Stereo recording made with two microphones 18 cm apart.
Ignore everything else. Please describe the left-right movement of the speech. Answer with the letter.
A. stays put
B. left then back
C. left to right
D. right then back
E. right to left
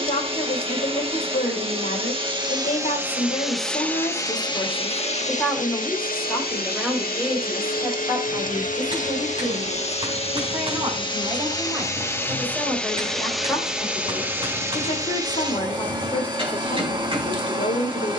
D.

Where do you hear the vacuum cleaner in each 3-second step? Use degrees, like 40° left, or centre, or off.
30° right, 20° left, 50° left, 30° left, centre, 20° right.